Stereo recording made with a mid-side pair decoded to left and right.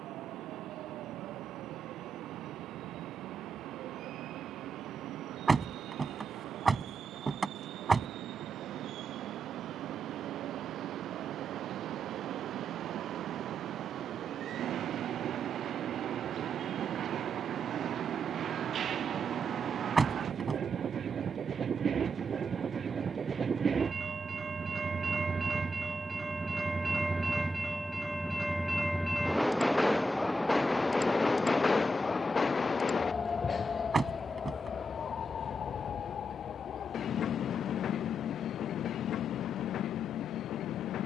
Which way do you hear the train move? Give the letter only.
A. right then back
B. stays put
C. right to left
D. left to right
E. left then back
C.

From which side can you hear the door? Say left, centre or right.
right.